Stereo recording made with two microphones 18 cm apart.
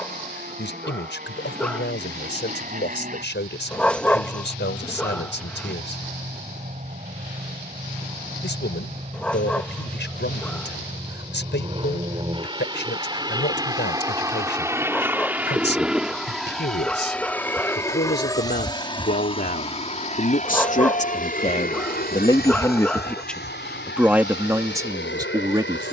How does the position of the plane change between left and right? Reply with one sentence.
You can hear the plane go from the right side to the left.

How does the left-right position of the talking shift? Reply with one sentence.
In this clip you hear the talking go from the left side to the right.